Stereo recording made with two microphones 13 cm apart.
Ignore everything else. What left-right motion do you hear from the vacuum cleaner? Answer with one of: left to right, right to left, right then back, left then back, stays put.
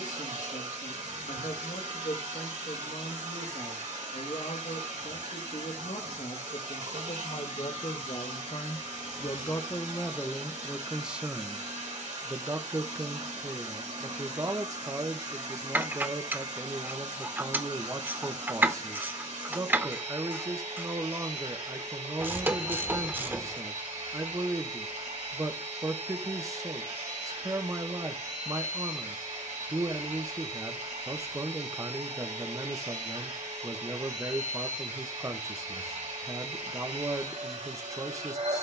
stays put.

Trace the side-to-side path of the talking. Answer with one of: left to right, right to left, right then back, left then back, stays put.
left to right.